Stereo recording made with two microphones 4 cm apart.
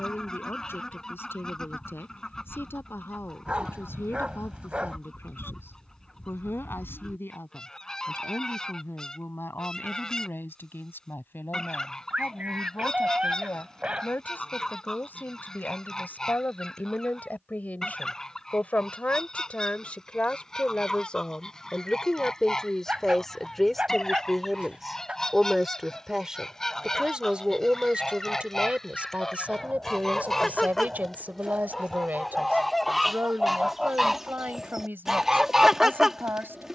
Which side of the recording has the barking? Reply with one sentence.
In this clip you hear the barking on the right.